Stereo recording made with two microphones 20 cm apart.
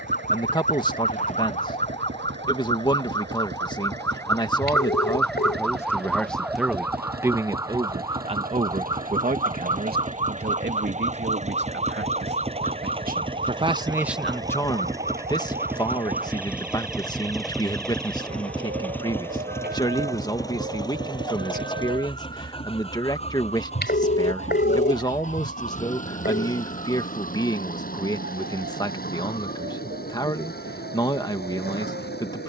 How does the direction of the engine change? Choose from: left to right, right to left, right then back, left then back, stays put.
right to left.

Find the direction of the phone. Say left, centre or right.
left.